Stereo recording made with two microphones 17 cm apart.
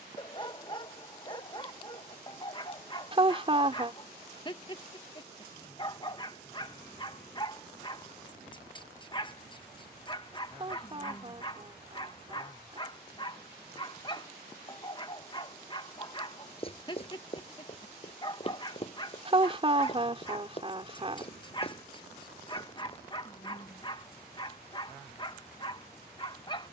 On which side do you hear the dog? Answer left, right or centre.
left.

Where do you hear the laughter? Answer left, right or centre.
right.